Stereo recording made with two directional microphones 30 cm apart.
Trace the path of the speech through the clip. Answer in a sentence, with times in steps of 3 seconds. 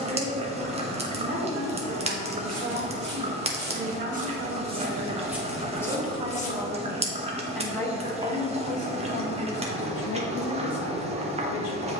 You can hear the speech on the right from 0 s, in the centre from 6 s and on the left from 9 s.